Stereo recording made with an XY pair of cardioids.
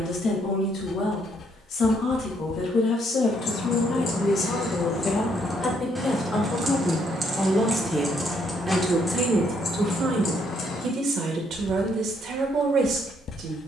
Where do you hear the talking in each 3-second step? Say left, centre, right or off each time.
left, left, centre, right, right.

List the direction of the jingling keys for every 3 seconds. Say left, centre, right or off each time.
off, left, centre, left, off.